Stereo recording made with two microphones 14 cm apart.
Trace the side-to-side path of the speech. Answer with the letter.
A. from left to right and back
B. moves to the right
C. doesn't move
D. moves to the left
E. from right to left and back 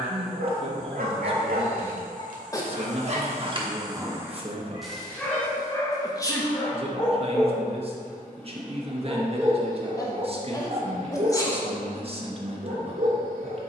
C.